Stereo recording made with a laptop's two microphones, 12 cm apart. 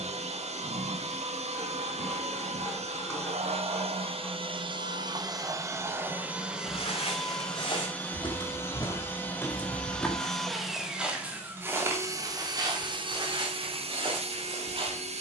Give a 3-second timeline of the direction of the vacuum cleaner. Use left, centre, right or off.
right, right, centre, centre, right.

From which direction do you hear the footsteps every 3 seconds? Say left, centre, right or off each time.
off, off, left, centre, right.